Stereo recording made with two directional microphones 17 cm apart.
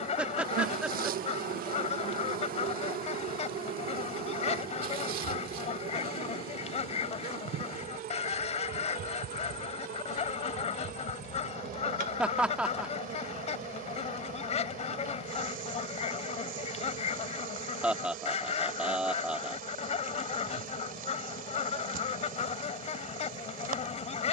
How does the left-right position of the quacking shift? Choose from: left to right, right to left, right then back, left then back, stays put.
stays put.